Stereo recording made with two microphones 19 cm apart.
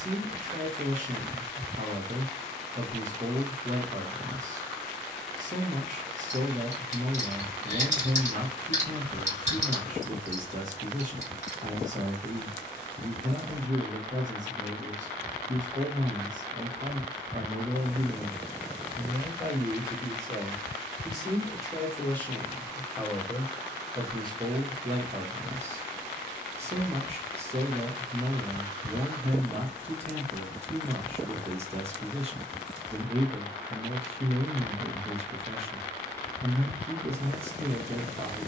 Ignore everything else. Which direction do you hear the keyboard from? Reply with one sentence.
You can hear the keyboard on the right.